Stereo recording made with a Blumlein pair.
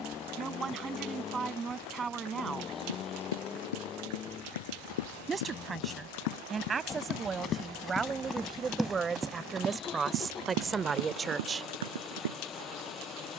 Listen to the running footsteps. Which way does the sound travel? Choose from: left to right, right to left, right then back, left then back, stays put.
left to right.